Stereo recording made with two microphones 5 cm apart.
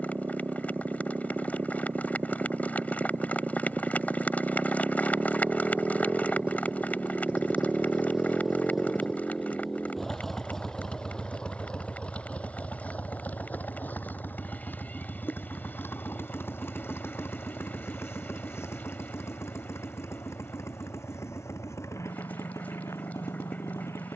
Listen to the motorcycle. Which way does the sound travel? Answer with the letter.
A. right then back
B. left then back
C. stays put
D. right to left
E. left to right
D.